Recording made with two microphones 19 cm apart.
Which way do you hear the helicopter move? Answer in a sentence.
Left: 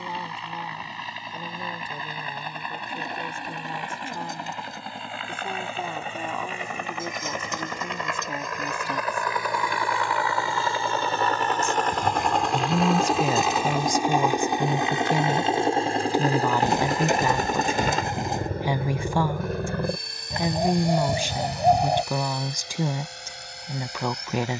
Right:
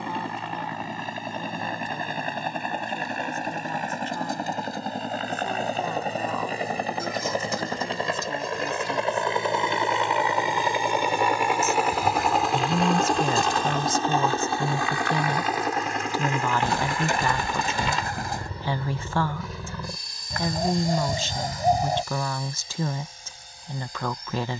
You can hear the helicopter travel towards the left.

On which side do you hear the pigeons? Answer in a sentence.
You can hear the pigeons on the left.